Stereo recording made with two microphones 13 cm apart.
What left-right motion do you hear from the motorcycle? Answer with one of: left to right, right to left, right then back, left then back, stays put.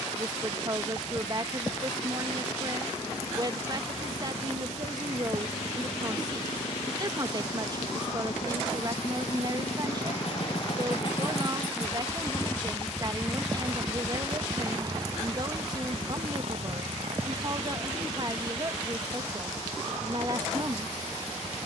left to right.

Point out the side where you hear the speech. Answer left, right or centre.
right.